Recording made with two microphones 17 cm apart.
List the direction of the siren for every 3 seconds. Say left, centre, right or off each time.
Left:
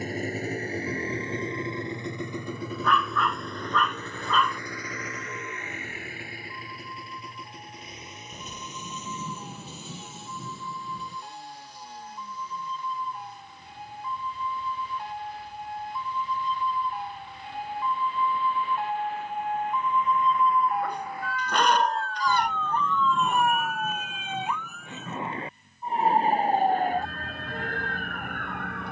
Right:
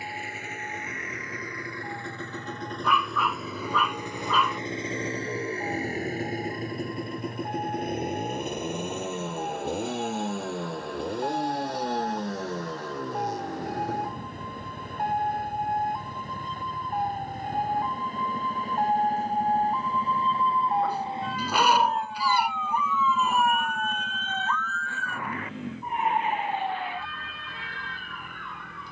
right, right, right, right, right, right, right, centre, left, left.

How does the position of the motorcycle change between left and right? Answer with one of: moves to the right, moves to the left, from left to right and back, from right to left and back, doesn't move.
moves to the right.